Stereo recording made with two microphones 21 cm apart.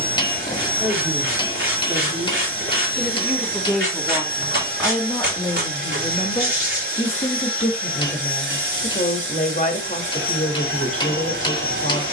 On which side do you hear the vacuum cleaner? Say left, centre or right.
right.